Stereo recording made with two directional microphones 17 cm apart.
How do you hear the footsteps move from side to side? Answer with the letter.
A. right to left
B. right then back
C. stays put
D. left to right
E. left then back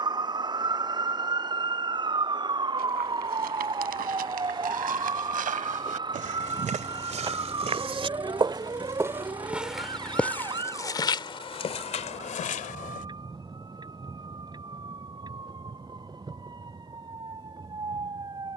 A.